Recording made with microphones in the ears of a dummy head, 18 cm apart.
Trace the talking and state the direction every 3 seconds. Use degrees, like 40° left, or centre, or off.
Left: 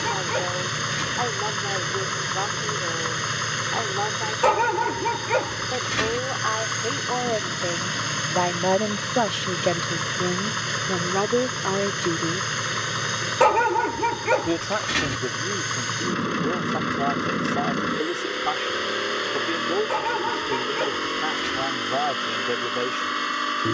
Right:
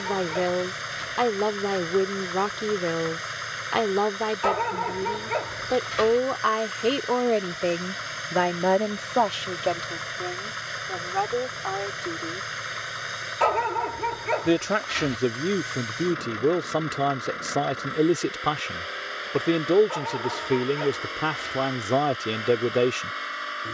60° right, 60° right, 30° right, 40° left, centre, 50° right, 50° right, 50° right.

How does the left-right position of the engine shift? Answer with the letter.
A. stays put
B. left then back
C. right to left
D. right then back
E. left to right
A.